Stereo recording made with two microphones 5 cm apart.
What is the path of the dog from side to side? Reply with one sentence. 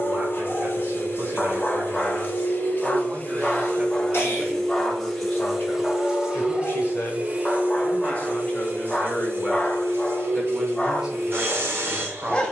You can hear the dog stay put.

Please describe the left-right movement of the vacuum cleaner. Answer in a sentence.
You can hear the vacuum cleaner move to the right.